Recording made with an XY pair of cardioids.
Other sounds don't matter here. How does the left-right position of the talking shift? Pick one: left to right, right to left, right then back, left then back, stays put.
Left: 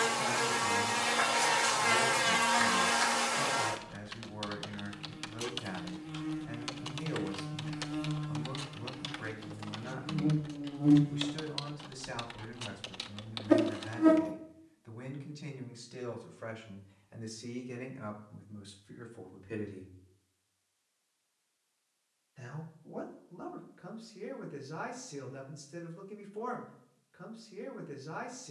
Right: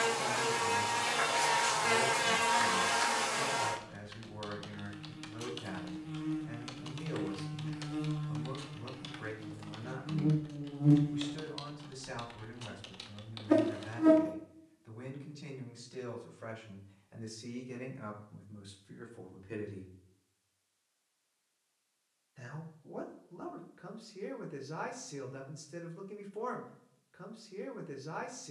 left to right.